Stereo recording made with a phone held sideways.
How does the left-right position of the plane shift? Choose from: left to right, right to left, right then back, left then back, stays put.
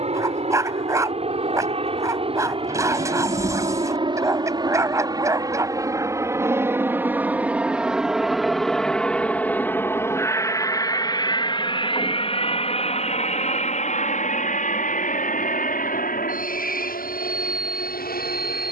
right to left.